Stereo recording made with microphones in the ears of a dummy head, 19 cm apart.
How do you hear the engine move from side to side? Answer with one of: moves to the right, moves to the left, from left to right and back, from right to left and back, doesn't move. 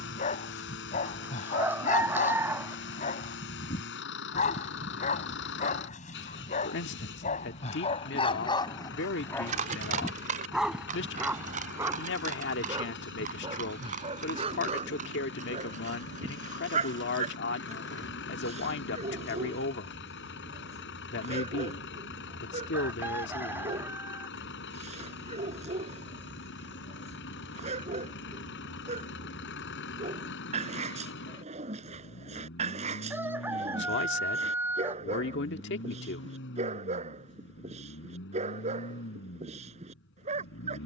doesn't move.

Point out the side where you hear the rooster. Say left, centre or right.
centre.